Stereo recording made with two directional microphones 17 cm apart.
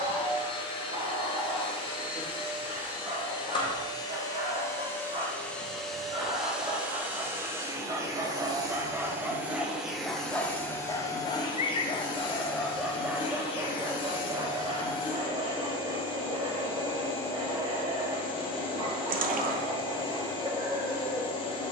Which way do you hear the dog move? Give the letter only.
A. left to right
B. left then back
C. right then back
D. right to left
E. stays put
B.